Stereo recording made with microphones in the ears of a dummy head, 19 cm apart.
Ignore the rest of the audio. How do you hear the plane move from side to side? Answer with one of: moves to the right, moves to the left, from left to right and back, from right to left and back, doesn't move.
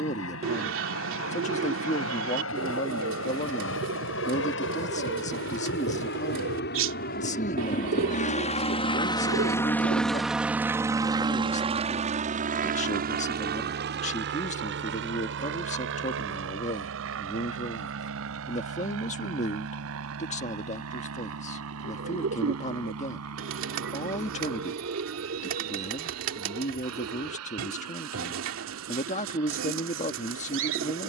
moves to the right.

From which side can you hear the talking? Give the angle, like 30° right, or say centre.
30° left.